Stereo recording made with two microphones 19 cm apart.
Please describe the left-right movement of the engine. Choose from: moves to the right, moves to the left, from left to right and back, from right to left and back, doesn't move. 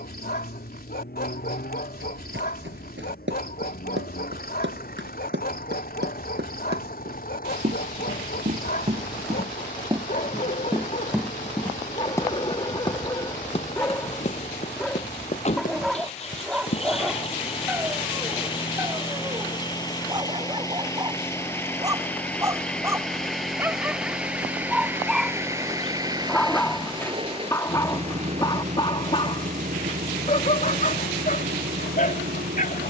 moves to the right.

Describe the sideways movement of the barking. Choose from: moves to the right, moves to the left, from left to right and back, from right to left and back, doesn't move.
from left to right and back.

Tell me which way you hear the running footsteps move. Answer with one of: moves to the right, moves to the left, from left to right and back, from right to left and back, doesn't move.
moves to the left.